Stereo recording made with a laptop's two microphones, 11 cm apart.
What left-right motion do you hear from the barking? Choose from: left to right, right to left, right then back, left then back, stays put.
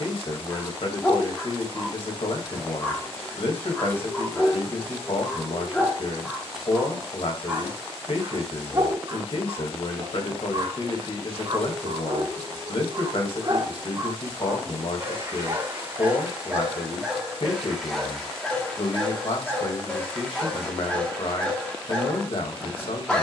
right then back.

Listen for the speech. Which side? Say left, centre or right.
left.